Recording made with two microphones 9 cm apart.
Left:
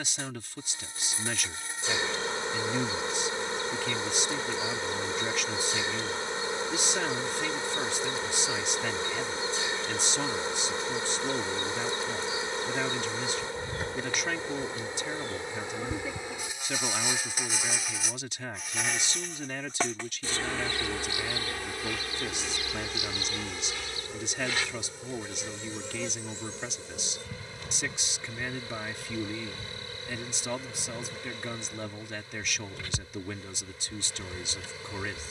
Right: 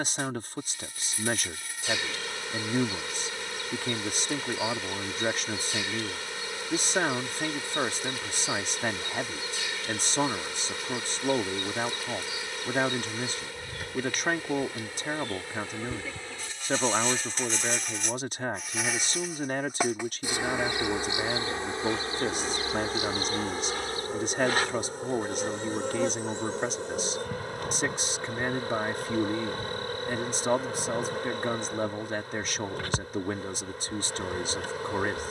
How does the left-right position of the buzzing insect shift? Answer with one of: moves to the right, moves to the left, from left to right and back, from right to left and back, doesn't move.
moves to the right.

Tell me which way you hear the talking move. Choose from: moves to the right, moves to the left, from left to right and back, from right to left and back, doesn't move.
doesn't move.